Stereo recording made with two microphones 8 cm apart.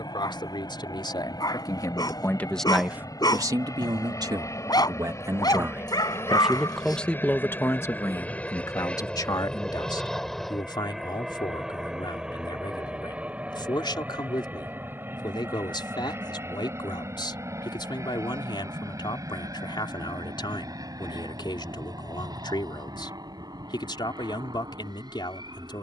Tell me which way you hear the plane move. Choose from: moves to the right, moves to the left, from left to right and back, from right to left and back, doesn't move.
moves to the right.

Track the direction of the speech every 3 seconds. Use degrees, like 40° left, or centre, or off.
40° left, 50° right, 20° left, 60° left, 60° left, 60° left, 60° left, 60° left, 60° left.